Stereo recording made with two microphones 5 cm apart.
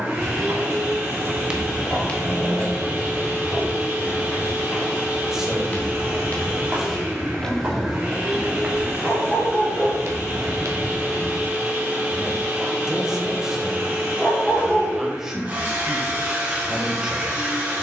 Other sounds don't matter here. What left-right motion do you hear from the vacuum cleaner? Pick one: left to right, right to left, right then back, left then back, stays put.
stays put.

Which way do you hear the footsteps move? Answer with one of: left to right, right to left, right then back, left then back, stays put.
left then back.